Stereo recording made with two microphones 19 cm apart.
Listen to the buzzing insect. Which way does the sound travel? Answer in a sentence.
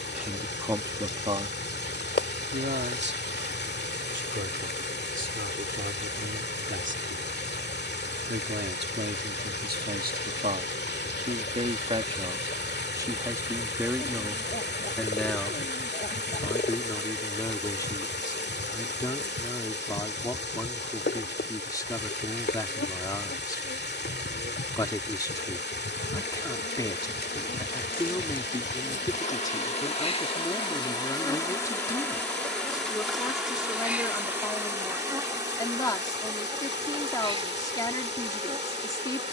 In this clip you hear the buzzing insect move to the right.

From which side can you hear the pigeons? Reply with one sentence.
You can hear the pigeons on the left.